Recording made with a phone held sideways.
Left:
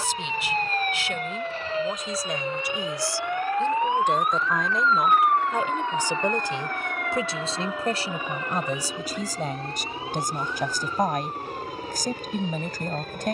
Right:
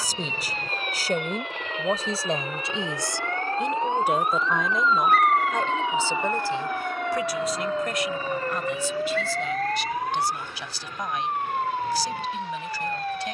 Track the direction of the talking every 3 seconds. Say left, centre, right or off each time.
right, centre, left, left, left.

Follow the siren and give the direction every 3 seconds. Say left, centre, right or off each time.
left, centre, right, right, right.